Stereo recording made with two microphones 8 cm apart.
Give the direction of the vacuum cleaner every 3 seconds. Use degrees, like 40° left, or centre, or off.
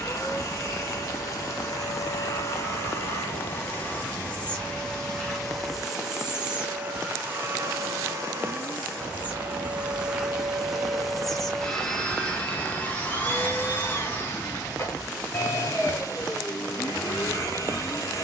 40° left, 20° left, 20° right, 10° right, 30° left, 40° left.